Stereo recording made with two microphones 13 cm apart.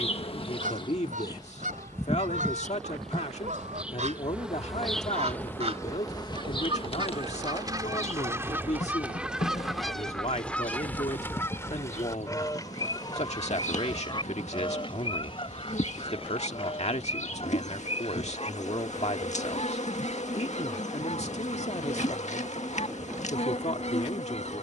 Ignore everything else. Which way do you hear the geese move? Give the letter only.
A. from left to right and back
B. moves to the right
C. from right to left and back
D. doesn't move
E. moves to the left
E.